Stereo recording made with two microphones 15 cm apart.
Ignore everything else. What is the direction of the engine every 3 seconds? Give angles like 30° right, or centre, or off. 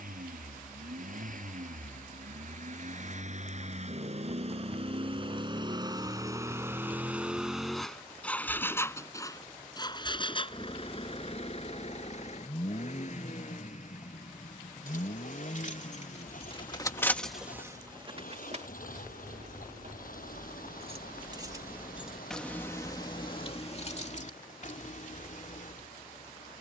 60° right, 40° right, centre, 40° left, 50° left, 60° left, 70° left, 70° left, 70° left.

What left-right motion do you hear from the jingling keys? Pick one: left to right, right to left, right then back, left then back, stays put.
right then back.